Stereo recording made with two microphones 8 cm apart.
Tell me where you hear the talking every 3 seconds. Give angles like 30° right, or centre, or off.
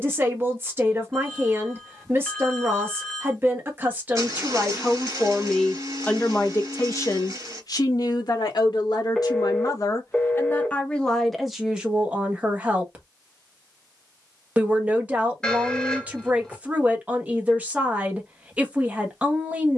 30° right, 10° right, 50° left, 20° left, 20° right, 20° right, 20° right.